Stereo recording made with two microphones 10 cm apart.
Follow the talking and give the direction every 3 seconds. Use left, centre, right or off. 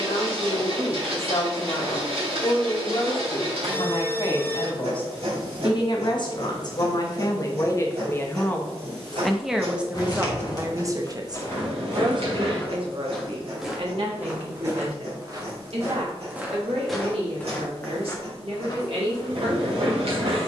left, left, left, right, right, right, right.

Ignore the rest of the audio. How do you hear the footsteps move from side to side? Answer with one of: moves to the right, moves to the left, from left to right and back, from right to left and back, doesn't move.
from left to right and back.